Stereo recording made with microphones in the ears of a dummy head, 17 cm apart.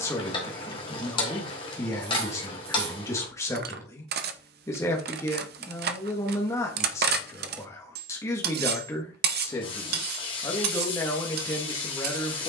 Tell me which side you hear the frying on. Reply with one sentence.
You can hear the frying on the left.